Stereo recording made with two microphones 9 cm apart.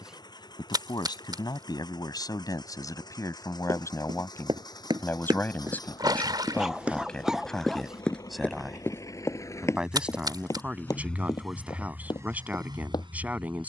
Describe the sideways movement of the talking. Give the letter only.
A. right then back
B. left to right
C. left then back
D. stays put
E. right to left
B.